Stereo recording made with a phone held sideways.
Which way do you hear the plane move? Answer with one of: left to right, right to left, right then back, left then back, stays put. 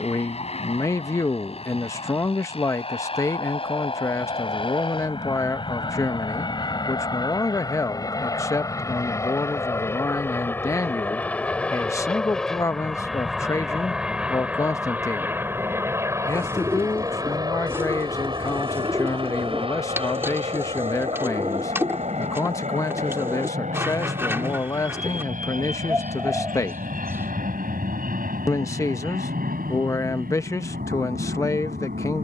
left to right.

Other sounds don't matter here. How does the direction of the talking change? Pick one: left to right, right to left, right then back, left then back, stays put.
stays put.